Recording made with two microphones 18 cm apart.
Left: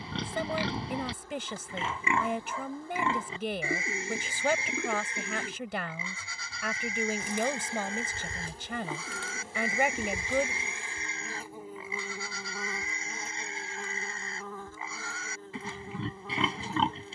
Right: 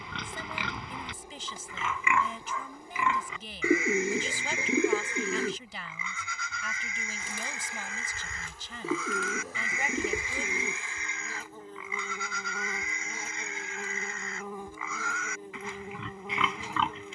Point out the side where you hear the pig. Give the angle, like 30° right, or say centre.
30° left.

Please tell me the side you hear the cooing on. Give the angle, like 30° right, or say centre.
40° right.